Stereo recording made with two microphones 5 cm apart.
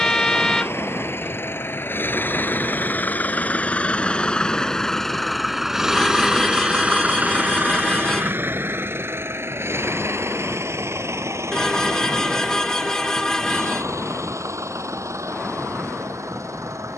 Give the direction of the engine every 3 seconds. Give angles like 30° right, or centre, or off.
50° left, 20° left, 30° right, 60° right, 70° right, 80° right.